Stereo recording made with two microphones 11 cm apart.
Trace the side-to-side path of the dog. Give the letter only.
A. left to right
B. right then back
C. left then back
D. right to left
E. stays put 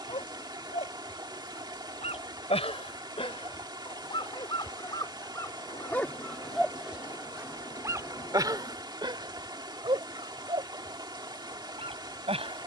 A.